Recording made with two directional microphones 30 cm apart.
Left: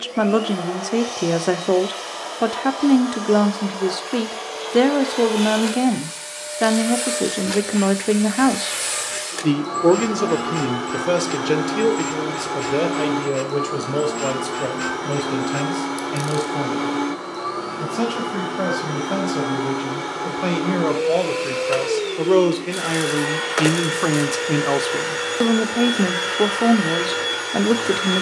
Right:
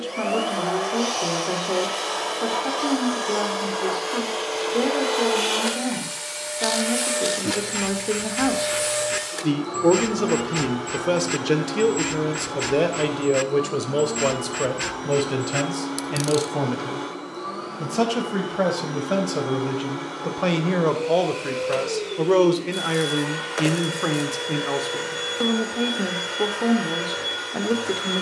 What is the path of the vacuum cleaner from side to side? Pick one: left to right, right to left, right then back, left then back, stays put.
right to left.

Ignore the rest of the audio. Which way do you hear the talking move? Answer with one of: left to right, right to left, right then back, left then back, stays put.
right then back.